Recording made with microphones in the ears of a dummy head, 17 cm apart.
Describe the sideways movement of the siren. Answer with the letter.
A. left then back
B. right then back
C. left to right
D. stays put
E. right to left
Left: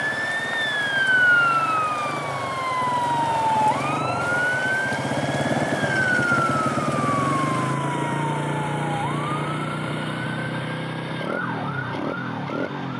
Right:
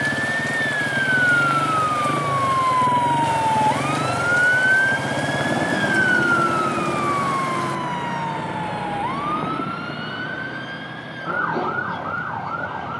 C.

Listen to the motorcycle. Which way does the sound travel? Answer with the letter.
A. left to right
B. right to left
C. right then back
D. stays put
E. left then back
B.